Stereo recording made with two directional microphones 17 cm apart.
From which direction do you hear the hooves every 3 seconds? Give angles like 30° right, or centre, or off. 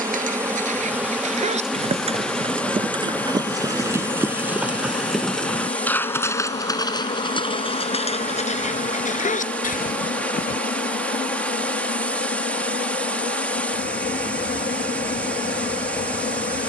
40° right, 10° right, 30° left, 50° left, off, off.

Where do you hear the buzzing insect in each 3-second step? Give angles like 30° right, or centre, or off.
centre, 20° left, 40° left, 60° left, 60° left, 60° left.